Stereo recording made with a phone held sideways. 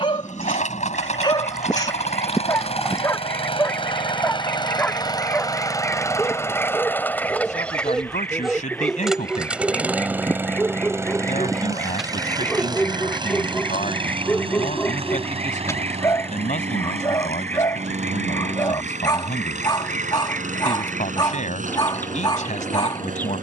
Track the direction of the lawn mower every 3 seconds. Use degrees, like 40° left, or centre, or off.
50° left, 30° left, 10° left, 10° right, 30° right, 40° right, 50° right, 60° right.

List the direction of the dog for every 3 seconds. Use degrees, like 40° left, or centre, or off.
30° left, 10° left, centre, centre, 10° left, 20° left, 30° left, 30° left.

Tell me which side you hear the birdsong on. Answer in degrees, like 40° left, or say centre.
10° left.